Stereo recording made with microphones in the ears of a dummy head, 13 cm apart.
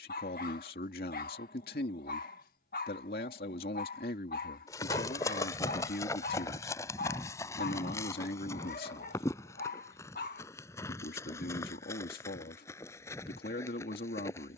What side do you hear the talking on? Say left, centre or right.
left.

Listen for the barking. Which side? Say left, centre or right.
left.